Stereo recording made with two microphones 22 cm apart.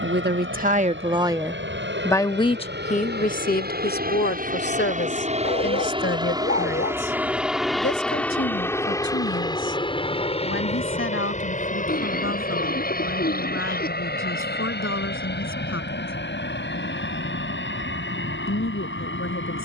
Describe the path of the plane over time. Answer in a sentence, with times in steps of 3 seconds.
In this clip you hear the plane on the right from 0 s, in the centre from 6 s and on the left from 9 s.